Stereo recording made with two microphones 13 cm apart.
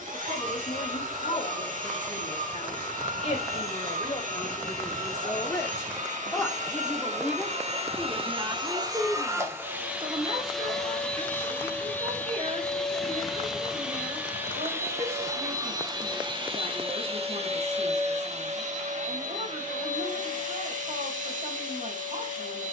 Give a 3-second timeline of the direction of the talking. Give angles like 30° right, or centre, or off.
50° left, 40° left, 10° right, 50° right, 60° right, 60° right, 60° right, 60° right.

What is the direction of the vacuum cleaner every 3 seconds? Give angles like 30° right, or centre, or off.
80° right, 70° right, 50° right, centre, centre, 40° right, 70° right, 70° right.